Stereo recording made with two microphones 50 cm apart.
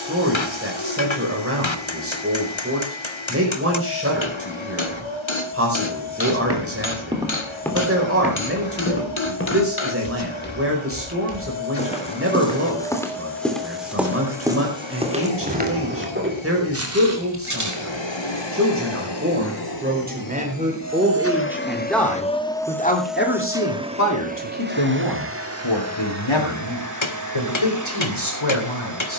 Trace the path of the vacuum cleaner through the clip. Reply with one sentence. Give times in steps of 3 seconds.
In this clip you hear the vacuum cleaner on the left from 0 s, in the centre from 21 s and on the right from 24 s.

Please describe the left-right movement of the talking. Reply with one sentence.
In this clip you hear the talking move to the left.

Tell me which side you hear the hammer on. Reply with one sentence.
You can hear the hammer on the left.